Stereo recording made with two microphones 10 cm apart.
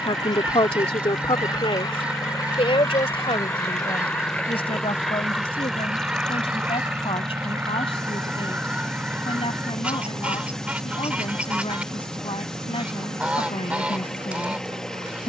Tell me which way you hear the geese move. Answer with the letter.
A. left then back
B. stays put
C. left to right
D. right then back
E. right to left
B.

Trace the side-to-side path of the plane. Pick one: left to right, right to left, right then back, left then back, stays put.
left to right.